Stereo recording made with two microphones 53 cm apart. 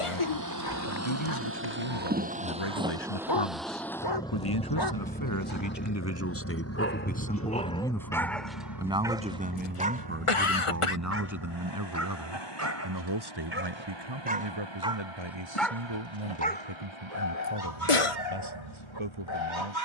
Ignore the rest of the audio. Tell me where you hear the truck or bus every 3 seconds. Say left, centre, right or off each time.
right, centre, left, left, left, left, left.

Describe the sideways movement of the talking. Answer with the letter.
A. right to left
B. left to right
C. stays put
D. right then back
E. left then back
B.